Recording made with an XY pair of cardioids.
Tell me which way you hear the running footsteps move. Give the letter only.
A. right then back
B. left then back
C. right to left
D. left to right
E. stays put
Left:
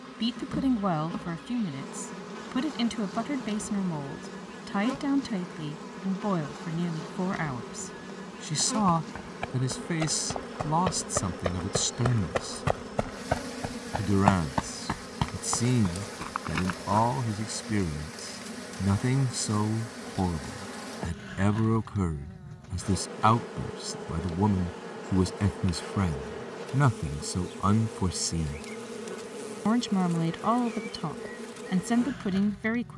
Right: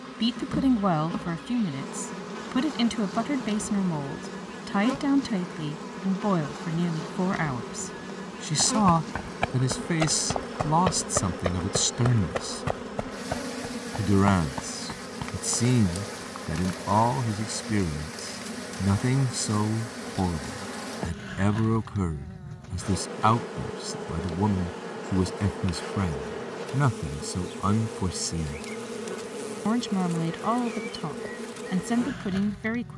C.